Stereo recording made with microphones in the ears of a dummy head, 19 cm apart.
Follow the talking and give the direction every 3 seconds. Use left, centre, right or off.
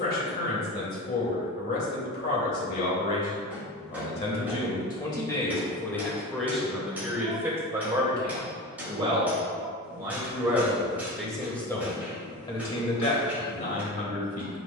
left, left, centre, centre, left.